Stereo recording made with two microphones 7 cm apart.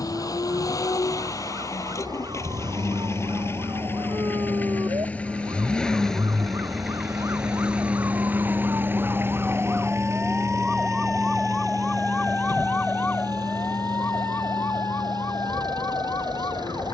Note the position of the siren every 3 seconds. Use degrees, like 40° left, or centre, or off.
70° right, 60° right, 40° right, 10° right, 30° left, 50° left.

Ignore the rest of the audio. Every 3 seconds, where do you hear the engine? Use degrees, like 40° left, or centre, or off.
50° left, 20° left, 10° right, 40° right, 60° right, 70° right.